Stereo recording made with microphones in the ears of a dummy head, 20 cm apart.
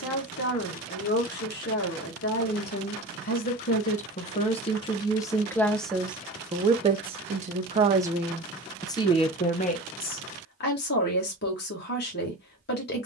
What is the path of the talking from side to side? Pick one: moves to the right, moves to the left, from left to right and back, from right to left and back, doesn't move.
from left to right and back.